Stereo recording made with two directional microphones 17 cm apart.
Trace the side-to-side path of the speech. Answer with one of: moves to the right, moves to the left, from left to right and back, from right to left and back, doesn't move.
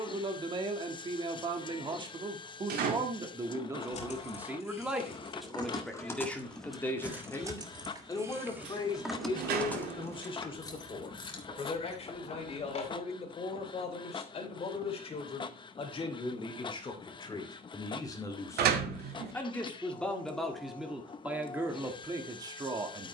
from right to left and back.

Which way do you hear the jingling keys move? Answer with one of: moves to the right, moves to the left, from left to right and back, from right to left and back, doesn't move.
from left to right and back.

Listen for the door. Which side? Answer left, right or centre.
right.